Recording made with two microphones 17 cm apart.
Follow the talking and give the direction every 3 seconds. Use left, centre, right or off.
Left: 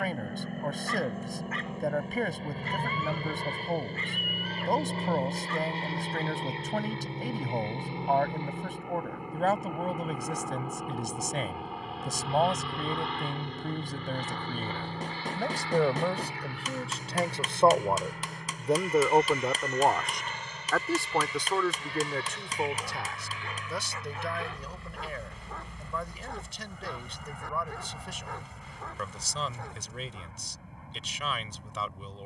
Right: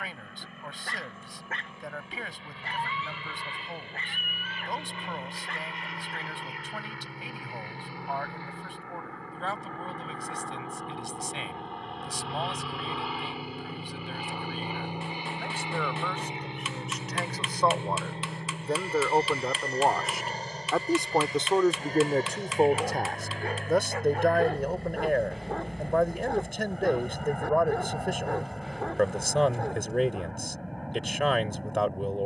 left, left, left, left, left, left, centre, right, right, right, right.